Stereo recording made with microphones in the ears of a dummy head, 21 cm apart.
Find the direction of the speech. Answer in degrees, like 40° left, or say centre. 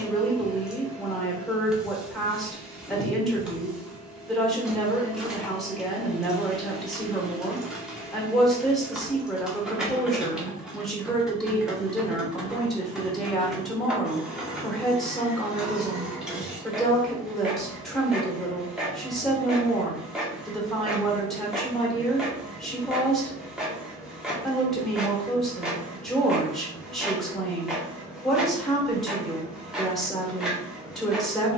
centre.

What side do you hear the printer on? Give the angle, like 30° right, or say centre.
centre.